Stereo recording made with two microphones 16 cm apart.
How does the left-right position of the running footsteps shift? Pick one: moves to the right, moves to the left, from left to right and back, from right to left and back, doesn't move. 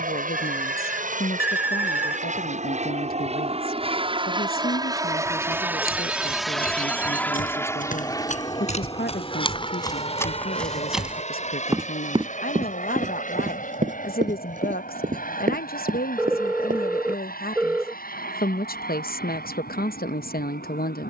moves to the right.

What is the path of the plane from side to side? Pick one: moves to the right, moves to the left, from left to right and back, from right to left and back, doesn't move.
moves to the left.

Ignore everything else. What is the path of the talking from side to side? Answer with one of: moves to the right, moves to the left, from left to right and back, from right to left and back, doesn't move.
doesn't move.